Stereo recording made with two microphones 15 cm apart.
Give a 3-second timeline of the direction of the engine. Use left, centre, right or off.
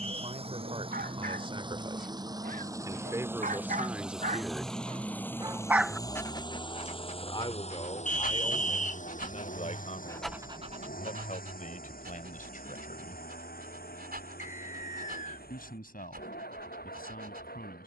right, centre, left, left, left, left.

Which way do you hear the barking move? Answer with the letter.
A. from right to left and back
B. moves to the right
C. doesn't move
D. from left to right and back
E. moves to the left
A.